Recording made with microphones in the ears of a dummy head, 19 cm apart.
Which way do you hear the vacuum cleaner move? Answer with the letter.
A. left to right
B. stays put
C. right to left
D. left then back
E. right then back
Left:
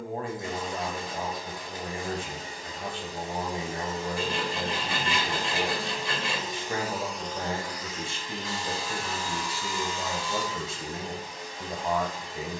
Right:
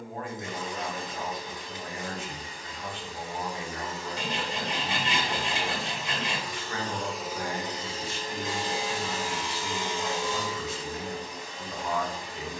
A.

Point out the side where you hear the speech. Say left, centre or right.
left.